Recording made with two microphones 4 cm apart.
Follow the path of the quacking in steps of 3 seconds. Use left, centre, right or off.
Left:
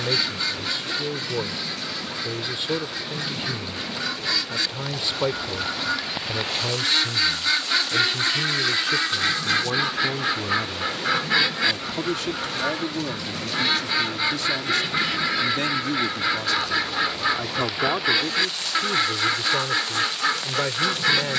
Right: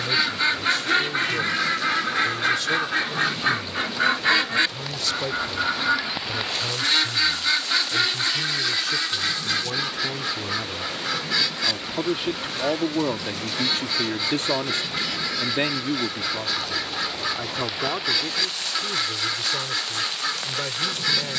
right, right, centre, left, left, left, left.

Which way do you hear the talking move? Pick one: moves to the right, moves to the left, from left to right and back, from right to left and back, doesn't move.
from left to right and back.